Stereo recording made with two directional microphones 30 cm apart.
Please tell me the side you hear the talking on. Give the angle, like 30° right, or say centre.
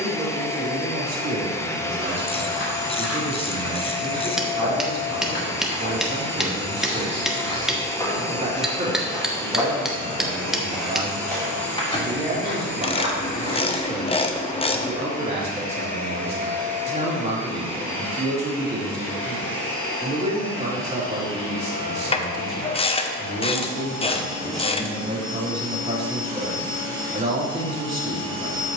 20° right.